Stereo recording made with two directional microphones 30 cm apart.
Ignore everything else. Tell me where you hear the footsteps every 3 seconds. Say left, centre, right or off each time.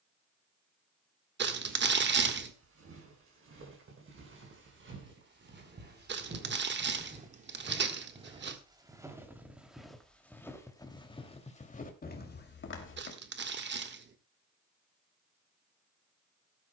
right, right, right, centre, left, off.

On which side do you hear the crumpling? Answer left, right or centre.
right.